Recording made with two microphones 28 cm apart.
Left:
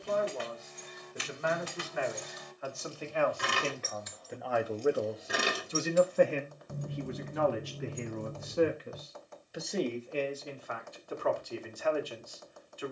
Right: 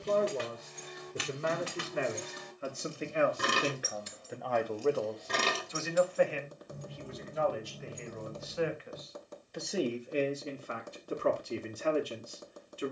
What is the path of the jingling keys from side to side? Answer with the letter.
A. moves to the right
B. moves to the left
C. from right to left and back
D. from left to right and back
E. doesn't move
B.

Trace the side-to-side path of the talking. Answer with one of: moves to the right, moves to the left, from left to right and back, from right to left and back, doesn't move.
from right to left and back.